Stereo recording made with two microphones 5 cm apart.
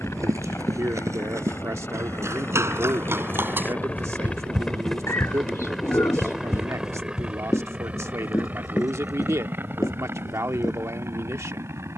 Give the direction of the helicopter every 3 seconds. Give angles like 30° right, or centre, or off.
40° left, 10° left, 20° right, 40° right.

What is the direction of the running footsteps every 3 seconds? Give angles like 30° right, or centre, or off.
60° right, 20° right, 60° left, 80° left.